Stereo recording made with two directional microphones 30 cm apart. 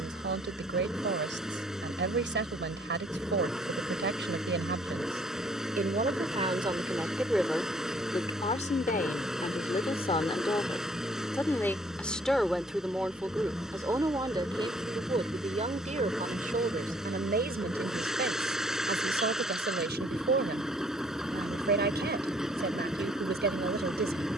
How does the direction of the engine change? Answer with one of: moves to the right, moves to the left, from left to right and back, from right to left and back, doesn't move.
doesn't move.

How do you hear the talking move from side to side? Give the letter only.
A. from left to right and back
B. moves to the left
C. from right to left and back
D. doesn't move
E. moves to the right
C.